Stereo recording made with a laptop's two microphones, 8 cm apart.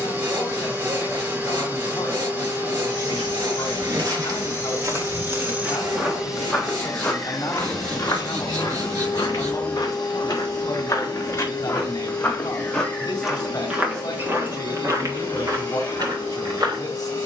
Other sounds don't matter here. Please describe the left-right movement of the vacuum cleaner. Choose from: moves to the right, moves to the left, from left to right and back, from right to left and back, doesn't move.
moves to the left.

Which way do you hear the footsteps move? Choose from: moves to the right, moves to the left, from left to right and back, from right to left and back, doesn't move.
from right to left and back.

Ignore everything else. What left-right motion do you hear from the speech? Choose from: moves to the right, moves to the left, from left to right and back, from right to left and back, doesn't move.
doesn't move.